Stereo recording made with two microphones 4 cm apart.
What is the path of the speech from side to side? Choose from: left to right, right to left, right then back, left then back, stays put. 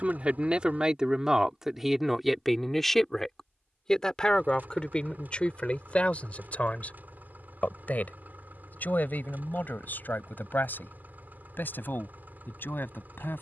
right to left.